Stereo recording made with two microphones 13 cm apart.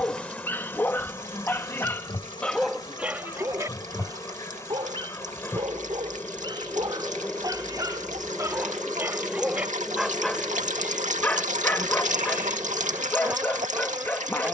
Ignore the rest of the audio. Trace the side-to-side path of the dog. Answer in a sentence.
You can hear the dog go right and come back.